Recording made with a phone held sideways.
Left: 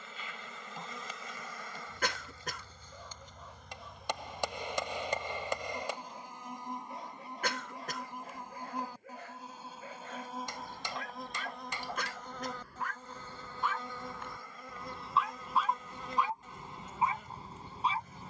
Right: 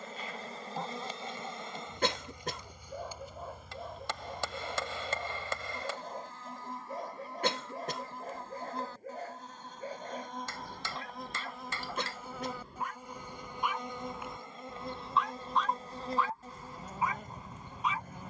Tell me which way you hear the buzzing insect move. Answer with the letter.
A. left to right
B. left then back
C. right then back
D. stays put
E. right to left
B.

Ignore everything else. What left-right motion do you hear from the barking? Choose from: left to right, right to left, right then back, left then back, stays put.
right to left.